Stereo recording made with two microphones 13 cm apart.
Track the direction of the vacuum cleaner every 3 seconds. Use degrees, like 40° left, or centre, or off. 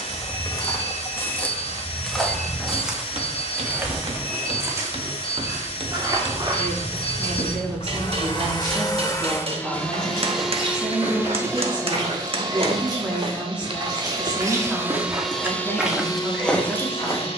50° left, 50° left, 50° left, centre, 40° right, 30° left.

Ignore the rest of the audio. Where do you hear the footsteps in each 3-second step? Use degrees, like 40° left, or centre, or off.
10° left, 20° right, 40° right, 40° right, 40° right, centre.